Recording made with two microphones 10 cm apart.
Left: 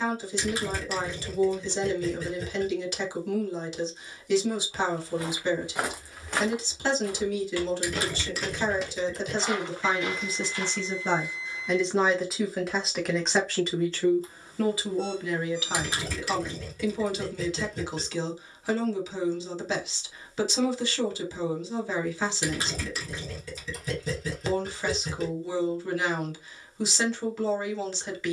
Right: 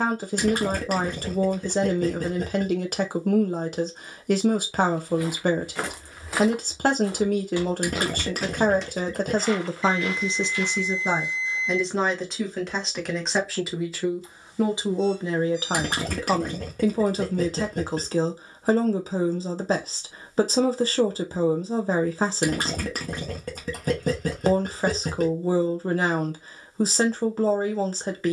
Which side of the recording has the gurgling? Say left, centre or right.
right.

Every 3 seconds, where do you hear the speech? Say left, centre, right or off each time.
right, right, right, right, centre, right, right, right, right, right.